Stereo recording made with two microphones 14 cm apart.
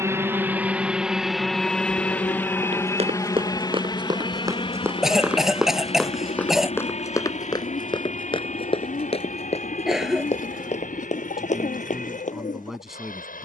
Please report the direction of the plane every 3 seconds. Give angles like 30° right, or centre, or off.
centre, 30° left, 50° left, 60° left, 60° left.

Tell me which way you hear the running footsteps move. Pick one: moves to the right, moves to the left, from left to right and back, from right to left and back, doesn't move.
moves to the left.